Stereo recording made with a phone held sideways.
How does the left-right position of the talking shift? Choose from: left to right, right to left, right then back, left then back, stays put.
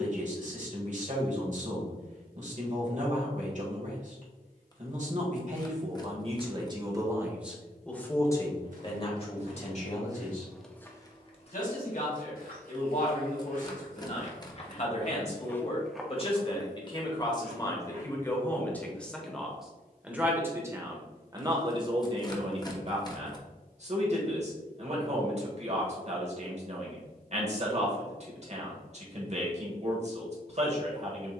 left then back.